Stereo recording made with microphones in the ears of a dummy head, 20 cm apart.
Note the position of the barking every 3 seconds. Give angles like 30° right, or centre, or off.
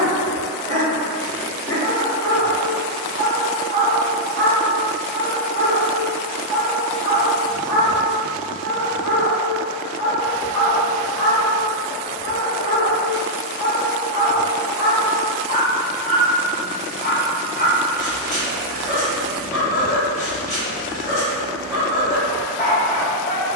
20° left, 40° right, 10° right, 20° left, 30° left, 30° left, 30° left, 30° left.